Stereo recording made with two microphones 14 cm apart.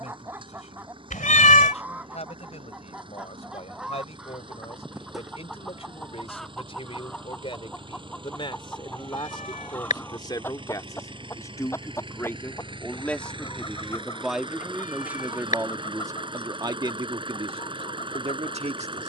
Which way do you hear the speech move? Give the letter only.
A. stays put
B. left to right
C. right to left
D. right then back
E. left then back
B.